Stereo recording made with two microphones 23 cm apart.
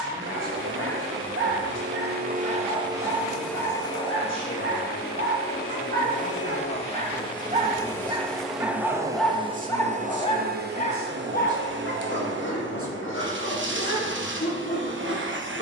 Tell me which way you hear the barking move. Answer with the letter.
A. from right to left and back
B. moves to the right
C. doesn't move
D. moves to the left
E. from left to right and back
D.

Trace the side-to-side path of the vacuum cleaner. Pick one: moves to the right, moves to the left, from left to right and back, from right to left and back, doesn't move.
from right to left and back.